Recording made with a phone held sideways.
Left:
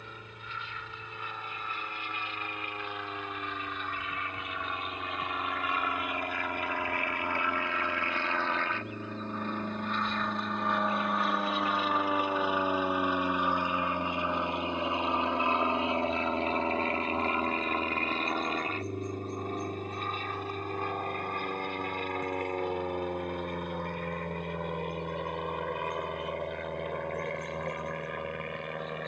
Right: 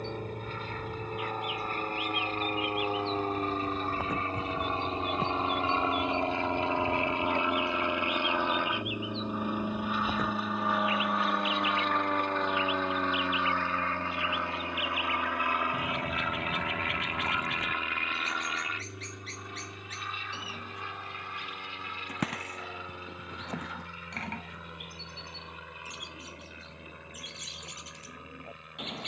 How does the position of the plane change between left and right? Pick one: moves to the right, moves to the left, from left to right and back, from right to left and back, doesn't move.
moves to the left.